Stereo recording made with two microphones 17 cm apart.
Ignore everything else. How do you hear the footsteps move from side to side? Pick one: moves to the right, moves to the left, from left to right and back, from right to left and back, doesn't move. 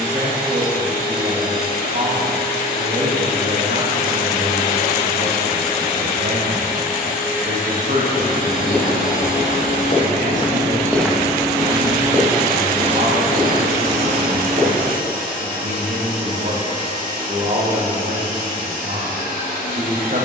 moves to the right.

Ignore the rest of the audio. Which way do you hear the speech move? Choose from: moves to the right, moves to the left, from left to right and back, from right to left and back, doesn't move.
doesn't move.